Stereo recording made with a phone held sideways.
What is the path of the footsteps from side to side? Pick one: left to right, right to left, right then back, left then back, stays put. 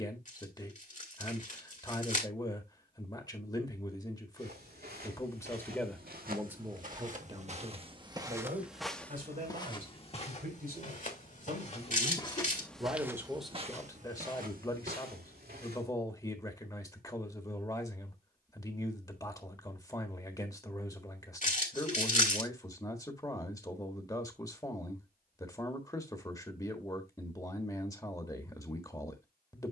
left then back.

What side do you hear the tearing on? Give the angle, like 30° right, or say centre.
50° left.